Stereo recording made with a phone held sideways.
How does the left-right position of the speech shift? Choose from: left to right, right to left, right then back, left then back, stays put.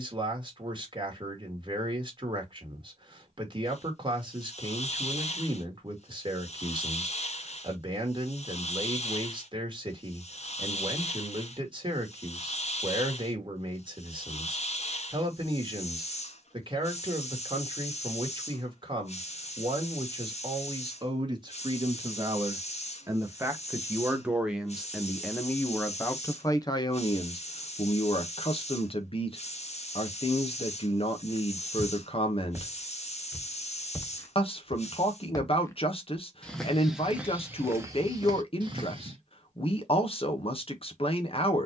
right to left.